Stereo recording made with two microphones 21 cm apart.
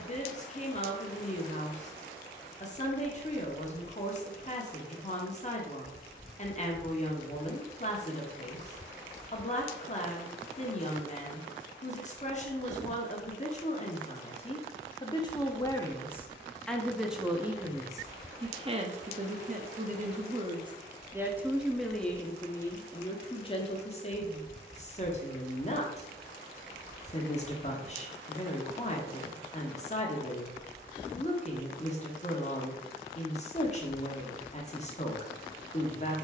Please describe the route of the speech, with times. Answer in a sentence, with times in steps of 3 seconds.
In this clip you hear the speech on the left from 0 s, in the centre from 15 s, on the right from 18 s, in the centre from 21 s and on the left from 24 s.